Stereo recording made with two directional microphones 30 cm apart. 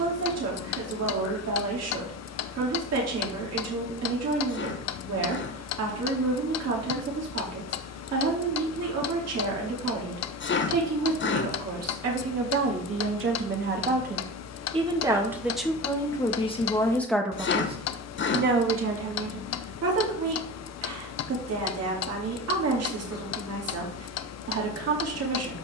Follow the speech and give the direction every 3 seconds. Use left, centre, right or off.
right, right, right, right, right, centre, right, right, right.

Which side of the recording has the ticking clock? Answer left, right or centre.
left.